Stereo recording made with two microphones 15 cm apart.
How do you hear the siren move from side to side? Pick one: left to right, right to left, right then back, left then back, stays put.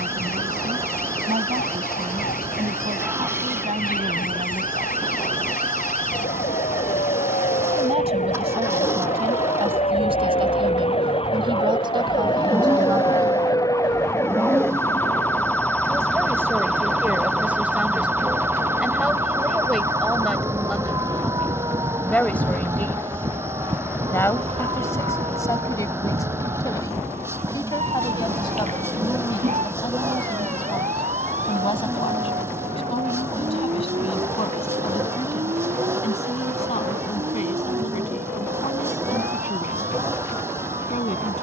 left to right.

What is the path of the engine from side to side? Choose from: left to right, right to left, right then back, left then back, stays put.
stays put.